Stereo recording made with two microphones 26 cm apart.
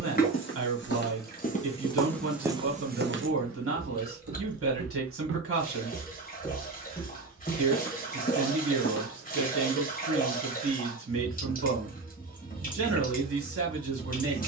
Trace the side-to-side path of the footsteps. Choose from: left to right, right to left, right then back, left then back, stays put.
right then back.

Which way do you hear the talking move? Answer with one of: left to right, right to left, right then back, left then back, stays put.
stays put.